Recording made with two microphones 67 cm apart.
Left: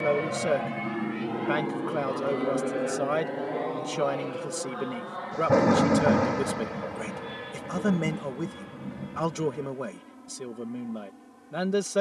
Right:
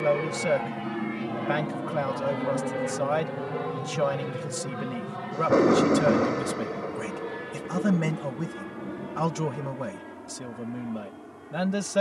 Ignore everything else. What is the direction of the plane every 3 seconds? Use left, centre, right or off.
centre, right, right, right.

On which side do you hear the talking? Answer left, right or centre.
right.